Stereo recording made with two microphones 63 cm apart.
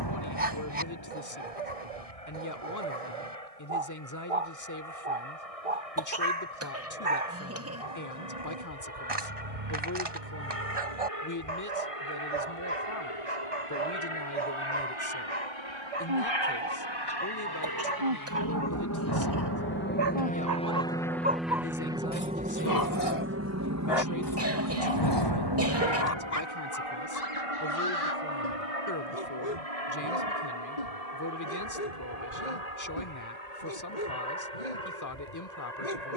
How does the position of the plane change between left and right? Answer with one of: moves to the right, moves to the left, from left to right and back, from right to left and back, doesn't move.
moves to the right.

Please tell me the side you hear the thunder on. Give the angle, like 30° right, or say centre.
40° left.